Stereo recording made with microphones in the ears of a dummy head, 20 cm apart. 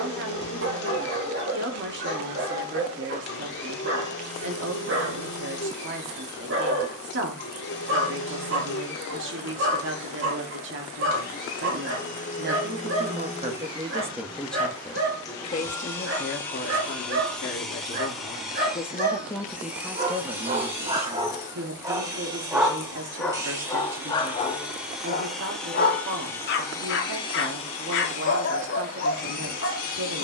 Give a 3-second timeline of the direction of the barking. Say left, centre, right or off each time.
right, right, right, right, right, right, right, centre, left, left.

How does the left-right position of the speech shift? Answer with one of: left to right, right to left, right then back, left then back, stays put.
left then back.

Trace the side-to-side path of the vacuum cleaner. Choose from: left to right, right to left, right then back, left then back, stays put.
right then back.